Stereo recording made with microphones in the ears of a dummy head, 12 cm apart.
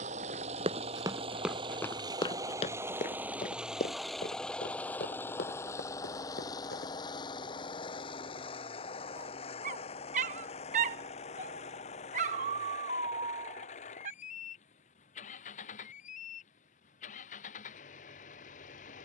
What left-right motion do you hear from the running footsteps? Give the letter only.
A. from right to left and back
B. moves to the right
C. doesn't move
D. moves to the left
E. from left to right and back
D.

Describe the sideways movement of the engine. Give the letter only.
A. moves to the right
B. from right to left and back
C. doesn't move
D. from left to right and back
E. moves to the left
E.